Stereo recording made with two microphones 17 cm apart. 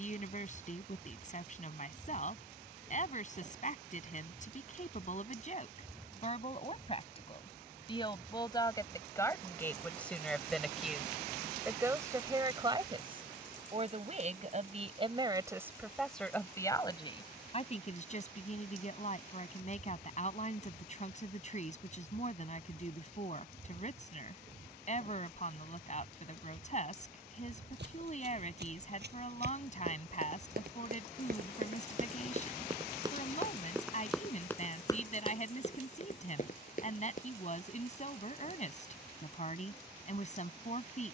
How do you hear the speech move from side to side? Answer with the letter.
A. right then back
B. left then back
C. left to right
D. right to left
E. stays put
A.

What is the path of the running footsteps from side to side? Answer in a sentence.
In this clip you hear the running footsteps move from right to left.